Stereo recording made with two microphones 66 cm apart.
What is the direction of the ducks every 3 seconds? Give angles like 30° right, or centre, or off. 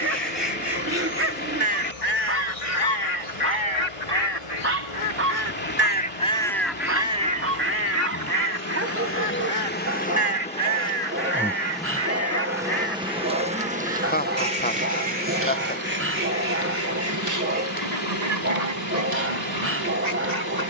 60° left, 30° left, 10° right, 50° right, 70° right, 70° right, 80° right.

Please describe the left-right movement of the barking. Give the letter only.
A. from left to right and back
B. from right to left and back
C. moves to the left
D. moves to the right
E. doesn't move
E.